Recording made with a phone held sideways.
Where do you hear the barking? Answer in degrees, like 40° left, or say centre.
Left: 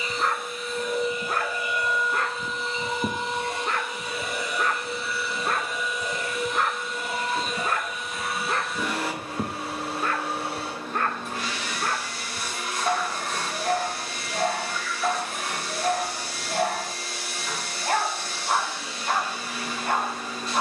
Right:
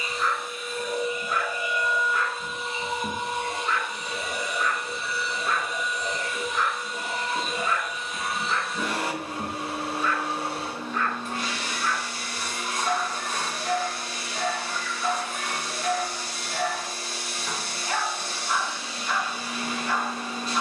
50° left.